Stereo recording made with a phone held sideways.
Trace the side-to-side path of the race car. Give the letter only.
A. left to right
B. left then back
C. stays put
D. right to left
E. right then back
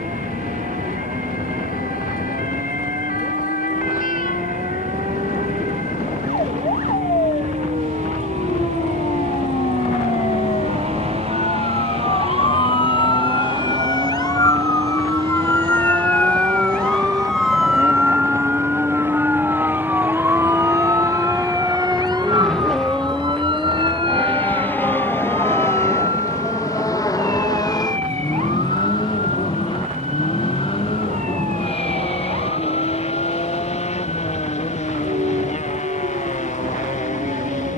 D.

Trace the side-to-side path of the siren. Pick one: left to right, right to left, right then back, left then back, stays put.
left to right.